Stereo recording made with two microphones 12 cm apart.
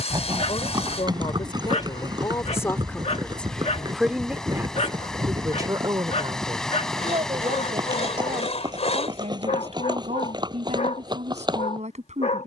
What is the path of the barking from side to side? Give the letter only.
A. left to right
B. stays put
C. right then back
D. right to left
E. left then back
B.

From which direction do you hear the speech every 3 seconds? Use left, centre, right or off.
left, centre, right, right.